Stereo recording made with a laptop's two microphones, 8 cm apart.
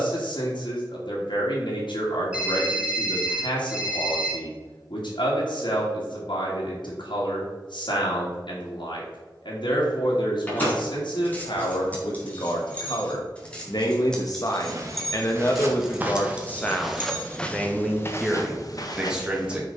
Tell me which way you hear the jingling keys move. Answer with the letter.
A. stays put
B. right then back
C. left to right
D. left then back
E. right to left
C.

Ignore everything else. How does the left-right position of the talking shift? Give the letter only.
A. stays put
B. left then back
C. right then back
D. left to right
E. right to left
D.